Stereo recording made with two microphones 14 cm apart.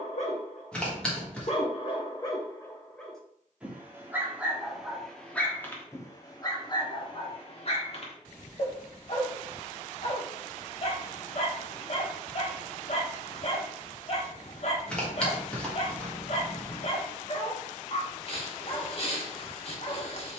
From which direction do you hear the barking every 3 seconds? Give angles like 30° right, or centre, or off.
40° left, centre, 40° left, 50° left, 50° left, 50° left, 50° left.